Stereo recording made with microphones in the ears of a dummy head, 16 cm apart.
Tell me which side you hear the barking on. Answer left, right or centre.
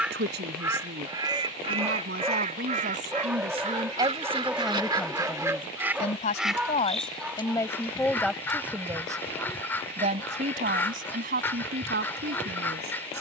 centre.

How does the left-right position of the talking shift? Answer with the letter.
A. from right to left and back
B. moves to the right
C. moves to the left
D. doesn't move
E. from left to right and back
A.